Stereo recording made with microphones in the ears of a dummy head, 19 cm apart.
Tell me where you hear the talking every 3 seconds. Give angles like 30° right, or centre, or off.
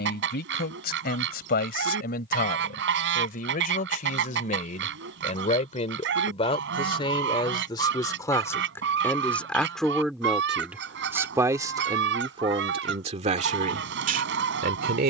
50° left, 40° left, 20° left, centre, 30° right.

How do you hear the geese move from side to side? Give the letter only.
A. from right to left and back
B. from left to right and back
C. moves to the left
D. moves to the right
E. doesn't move
E.